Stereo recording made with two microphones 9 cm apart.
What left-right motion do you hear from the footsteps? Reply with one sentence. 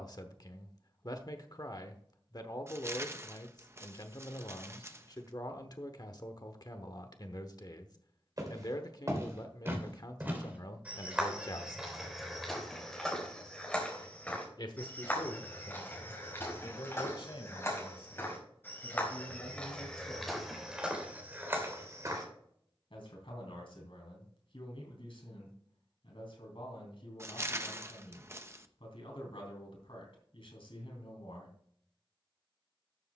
You can hear the footsteps move from right to left and back again.